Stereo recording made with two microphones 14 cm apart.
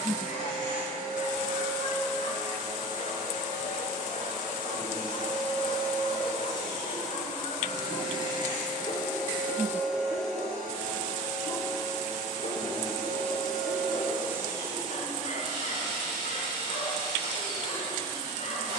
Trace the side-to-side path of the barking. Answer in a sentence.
In this clip you hear the barking stay in one place.